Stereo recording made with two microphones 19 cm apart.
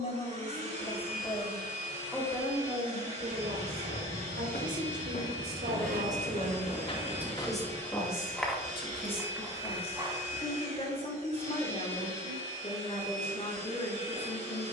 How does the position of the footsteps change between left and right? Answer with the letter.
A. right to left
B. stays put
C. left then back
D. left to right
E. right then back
D.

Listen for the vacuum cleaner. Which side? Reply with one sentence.
You can hear the vacuum cleaner on the right.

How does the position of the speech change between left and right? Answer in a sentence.
You can hear the speech go right and come back.